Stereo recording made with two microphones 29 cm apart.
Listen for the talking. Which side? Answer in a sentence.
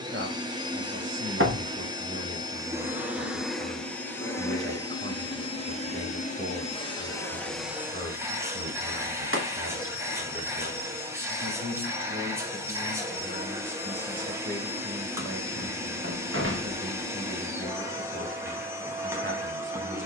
You can hear the talking on the right.